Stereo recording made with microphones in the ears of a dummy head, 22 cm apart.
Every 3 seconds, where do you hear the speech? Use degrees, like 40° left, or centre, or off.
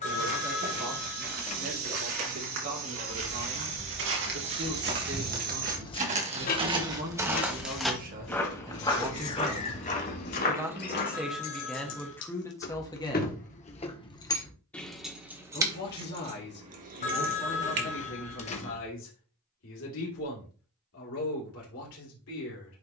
70° right, 60° right, 40° right, 10° right, 10° left, 50° left, 60° left, 60° left.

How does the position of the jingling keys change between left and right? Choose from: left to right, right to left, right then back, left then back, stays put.
left then back.